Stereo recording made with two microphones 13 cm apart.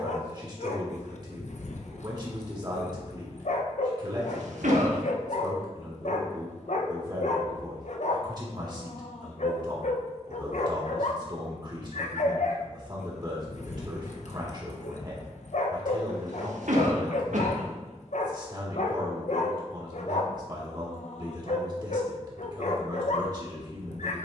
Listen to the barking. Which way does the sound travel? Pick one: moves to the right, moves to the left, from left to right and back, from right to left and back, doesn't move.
doesn't move.